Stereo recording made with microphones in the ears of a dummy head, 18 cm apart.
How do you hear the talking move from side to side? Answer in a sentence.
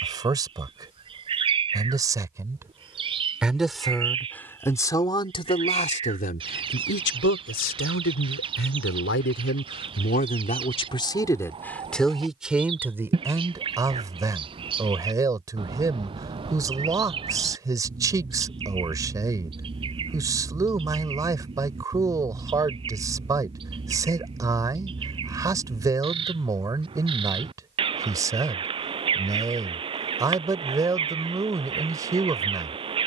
You can hear the talking go left and come back.